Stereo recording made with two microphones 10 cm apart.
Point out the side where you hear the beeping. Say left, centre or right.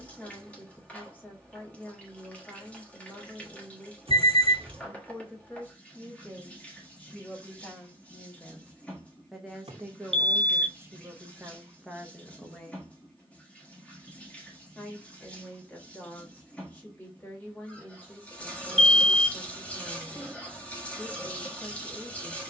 right.